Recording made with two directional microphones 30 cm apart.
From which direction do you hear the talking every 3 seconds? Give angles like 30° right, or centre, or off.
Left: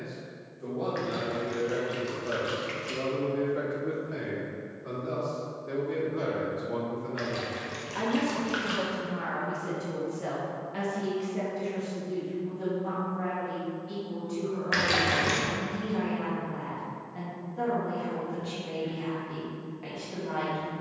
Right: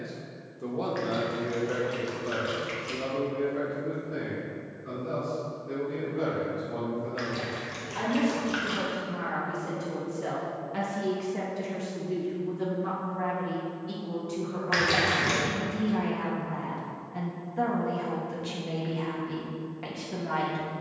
20° right, 30° left, 30° left, 10° right, 40° right, 40° right, 40° right.